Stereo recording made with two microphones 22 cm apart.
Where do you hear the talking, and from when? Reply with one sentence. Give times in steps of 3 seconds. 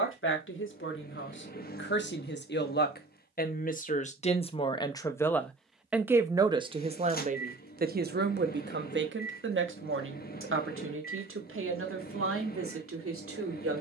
You can hear the talking on the left from 0 s and on the right from 6 s.